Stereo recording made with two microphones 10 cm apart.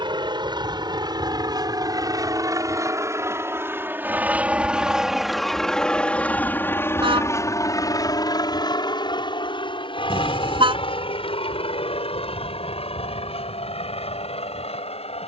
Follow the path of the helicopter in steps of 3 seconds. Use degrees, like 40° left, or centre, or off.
40° right, 10° right, 30° left, 60° left, 70° left.